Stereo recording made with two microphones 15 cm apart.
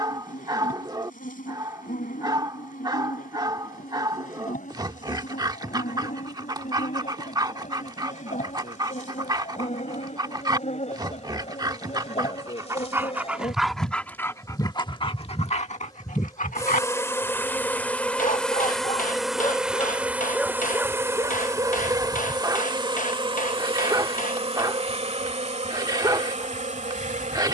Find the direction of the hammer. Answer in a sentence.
You can hear the hammer on the left.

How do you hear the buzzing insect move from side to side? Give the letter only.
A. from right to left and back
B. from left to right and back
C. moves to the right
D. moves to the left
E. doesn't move
C.